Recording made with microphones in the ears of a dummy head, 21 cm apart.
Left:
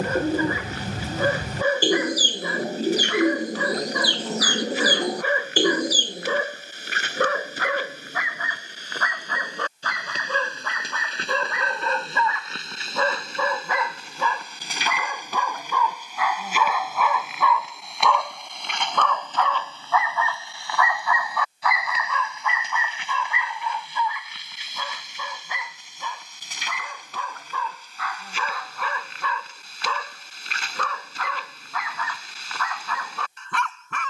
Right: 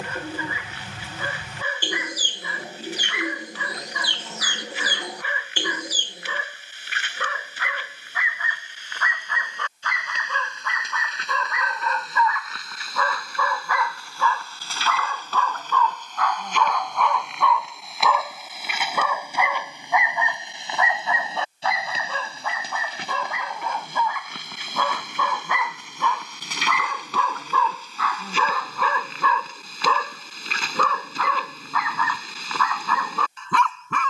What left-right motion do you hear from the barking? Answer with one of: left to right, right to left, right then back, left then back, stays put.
left to right.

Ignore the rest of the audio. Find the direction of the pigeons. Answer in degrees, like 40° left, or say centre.
30° left.